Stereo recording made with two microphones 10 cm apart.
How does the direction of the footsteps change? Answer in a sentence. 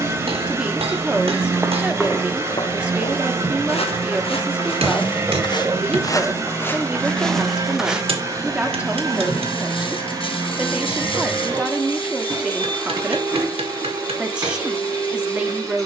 You can hear the footsteps go left and come back.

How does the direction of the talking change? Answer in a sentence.
You can hear the talking stay in one place.